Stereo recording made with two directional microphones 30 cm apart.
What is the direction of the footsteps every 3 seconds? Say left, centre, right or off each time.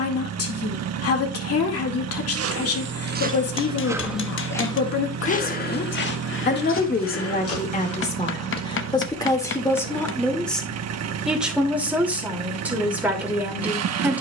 right, centre, left, off, off.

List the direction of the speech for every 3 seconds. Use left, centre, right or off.
left, left, left, centre, centre.